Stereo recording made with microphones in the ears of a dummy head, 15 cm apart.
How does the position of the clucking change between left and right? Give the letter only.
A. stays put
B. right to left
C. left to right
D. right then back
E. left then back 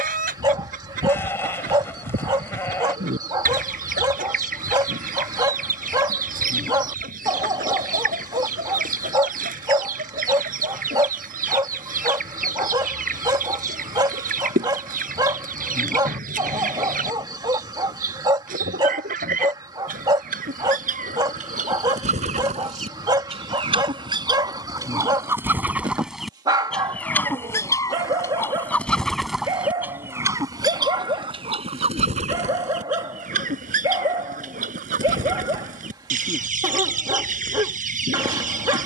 E.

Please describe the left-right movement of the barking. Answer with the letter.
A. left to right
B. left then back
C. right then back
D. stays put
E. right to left
D.